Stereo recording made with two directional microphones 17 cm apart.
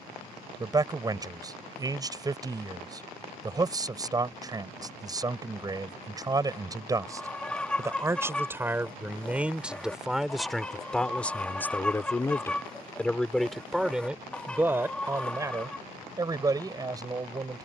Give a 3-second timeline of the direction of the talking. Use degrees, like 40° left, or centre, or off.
20° right, 20° right, 20° right, centre, centre, 20° right.